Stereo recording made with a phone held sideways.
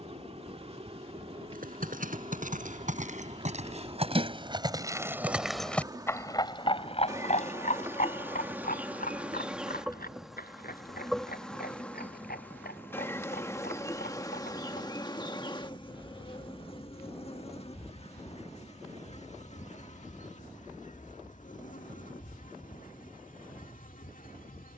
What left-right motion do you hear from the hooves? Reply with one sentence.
In this clip you hear the hooves move to the left.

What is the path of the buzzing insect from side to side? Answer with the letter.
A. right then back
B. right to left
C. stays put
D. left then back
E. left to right
B.